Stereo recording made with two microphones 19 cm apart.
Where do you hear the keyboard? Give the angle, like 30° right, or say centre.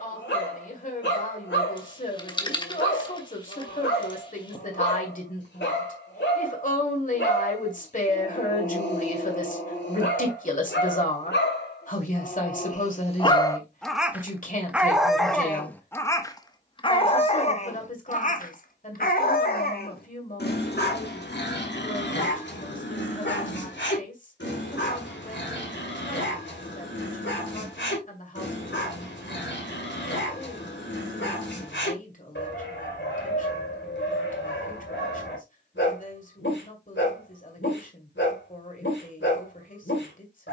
20° left.